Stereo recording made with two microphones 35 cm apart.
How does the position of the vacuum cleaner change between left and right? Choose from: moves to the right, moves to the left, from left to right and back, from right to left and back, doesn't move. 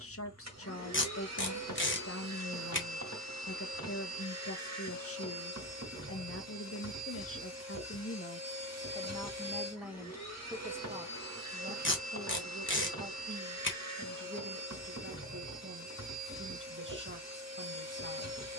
doesn't move.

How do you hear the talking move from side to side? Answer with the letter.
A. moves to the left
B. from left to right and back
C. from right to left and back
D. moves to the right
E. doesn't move
D.